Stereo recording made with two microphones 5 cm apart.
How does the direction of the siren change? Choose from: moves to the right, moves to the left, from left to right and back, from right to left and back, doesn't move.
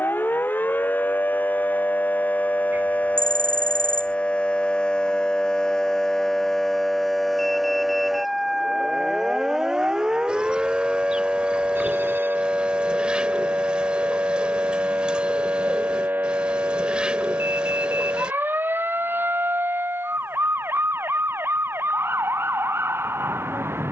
moves to the right.